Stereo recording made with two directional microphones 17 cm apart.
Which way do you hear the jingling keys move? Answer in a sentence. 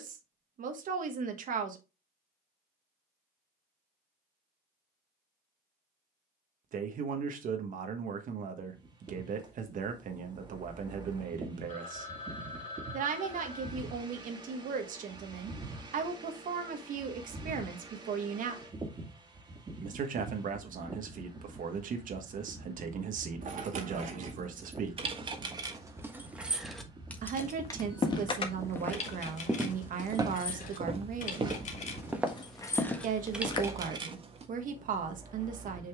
You can hear the jingling keys move from right to left and back again.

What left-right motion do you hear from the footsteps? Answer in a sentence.
You can hear the footsteps go right and come back.